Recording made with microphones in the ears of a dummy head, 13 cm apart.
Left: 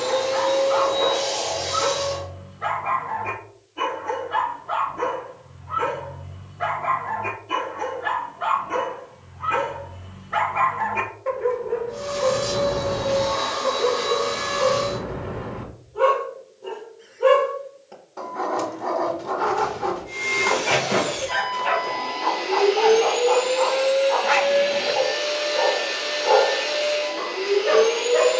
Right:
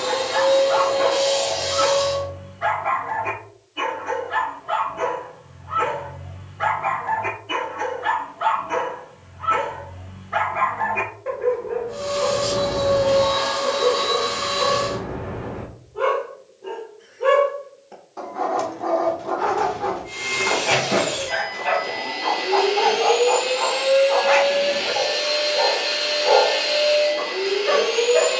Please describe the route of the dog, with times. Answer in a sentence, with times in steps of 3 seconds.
In this clip you hear the dog on the right from 0 s and in the centre from 9 s.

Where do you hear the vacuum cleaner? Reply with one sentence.
You can hear the vacuum cleaner on the right.